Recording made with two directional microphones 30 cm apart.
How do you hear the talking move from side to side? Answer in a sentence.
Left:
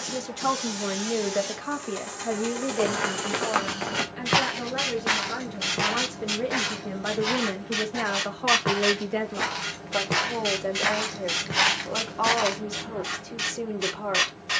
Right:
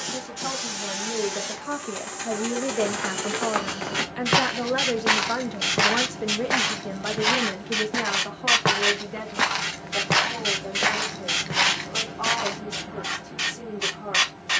You can hear the talking go right and come back.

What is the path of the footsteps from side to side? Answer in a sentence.
You can hear the footsteps move from left to right and back again.